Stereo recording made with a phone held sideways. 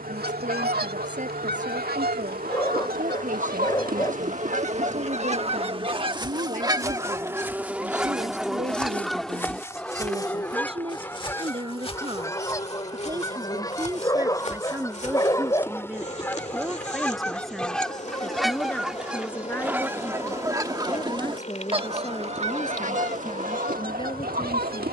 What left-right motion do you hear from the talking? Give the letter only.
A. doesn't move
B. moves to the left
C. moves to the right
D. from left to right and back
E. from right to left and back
B.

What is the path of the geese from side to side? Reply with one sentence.
You can hear the geese go left and come back.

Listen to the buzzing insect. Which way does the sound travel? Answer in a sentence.
You can hear the buzzing insect go from the right side to the left.